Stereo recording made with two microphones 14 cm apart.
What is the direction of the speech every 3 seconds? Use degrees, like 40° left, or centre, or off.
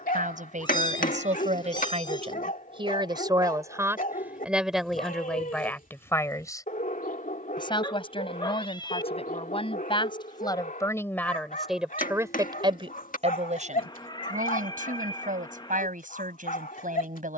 50° right, 10° right, 30° left, 20° left, 50° right, 70° right.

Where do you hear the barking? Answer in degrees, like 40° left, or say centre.
70° left.